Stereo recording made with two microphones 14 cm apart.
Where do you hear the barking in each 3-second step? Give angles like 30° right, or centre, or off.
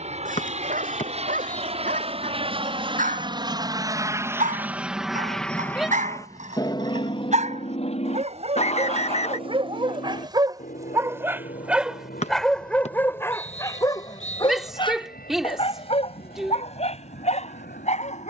80° right, 70° right, 60° right, 30° right, 20° left, 50° left.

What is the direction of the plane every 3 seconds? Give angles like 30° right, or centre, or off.
60° right, 10° right, 40° left, 60° left, 70° left, 80° left.